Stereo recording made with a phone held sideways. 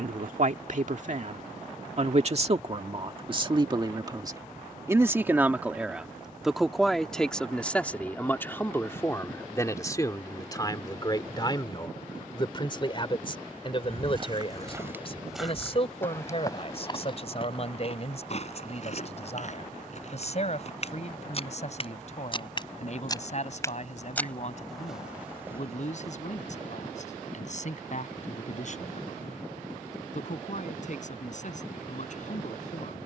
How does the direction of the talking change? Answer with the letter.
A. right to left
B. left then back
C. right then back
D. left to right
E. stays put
A.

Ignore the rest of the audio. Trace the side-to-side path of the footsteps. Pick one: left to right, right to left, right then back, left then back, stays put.
left then back.